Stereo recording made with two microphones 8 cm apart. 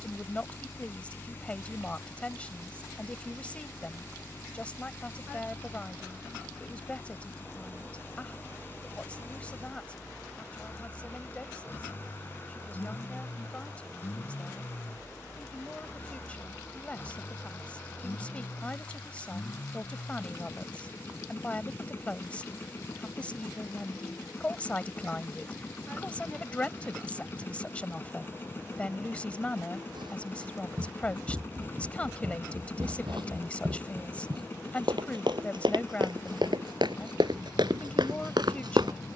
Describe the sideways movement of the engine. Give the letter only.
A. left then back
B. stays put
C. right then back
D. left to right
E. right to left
B.